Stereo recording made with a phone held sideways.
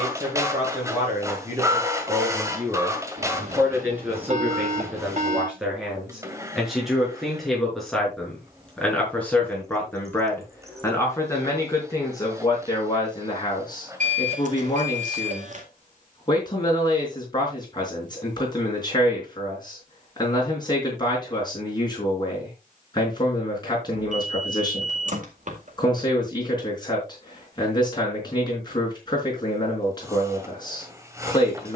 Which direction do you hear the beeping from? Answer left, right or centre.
right.